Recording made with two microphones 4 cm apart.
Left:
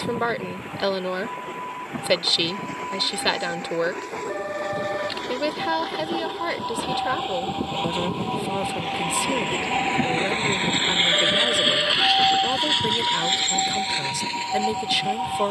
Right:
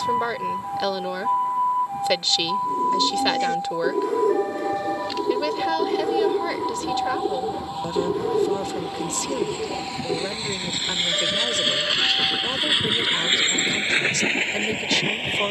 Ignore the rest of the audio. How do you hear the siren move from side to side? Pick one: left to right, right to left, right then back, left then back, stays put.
right to left.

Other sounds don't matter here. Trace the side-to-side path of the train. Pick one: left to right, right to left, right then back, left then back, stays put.
left to right.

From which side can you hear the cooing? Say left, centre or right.
right.